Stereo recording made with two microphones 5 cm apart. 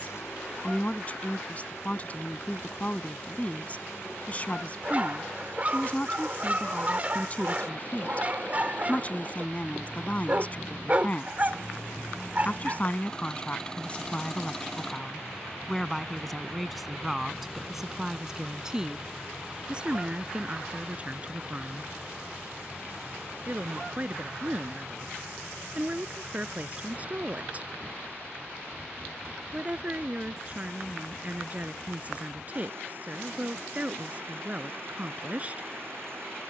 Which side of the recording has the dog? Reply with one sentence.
In this clip you hear the dog on the right.